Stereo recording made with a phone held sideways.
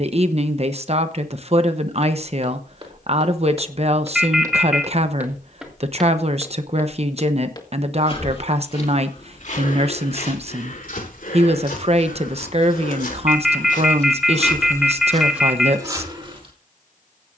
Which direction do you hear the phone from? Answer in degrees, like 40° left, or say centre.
centre.